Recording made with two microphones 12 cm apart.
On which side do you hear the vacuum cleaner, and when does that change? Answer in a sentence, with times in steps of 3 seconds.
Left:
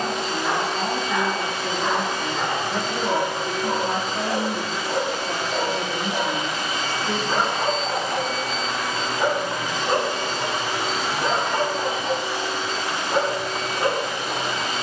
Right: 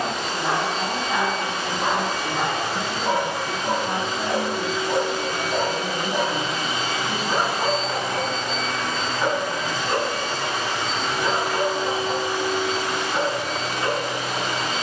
You can hear the vacuum cleaner on the right from 0 s, in the centre from 6 s and on the right from 12 s.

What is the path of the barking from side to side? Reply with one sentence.
You can hear the barking move from right to left.